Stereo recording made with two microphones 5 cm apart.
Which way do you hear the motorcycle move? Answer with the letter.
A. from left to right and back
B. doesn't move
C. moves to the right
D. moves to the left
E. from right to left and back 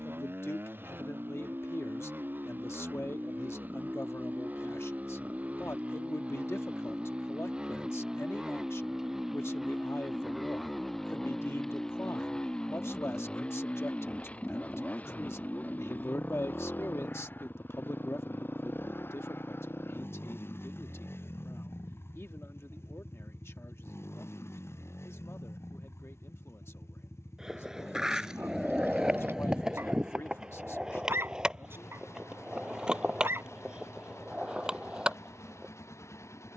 D.